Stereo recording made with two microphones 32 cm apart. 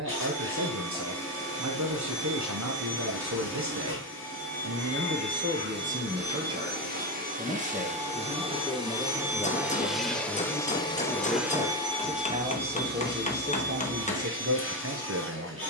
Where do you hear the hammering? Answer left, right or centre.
left.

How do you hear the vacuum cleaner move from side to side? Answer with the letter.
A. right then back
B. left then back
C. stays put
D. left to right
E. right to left
B.